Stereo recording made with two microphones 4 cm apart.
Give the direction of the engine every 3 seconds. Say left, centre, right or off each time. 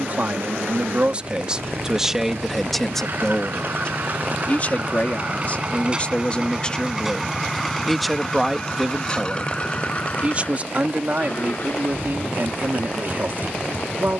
right, right, centre, left, left.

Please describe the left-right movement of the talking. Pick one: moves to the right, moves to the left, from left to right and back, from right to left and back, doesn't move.
from right to left and back.